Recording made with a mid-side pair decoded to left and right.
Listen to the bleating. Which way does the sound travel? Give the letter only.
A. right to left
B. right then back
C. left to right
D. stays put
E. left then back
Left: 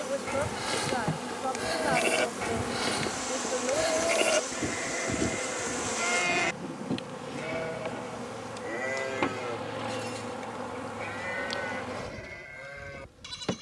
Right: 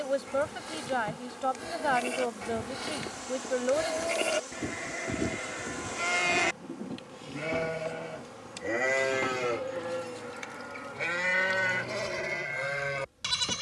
C.